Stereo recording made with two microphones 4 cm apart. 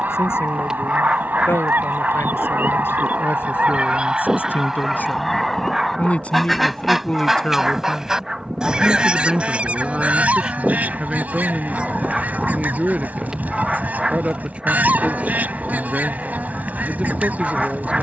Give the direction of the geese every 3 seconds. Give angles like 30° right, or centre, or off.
50° right, 10° right, 10° right, 40° right, 40° right, 40° right.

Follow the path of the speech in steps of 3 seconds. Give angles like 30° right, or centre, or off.
80° left, 60° left, 20° left, 20° right, 30° right, 30° right.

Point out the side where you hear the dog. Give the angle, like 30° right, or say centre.
20° right.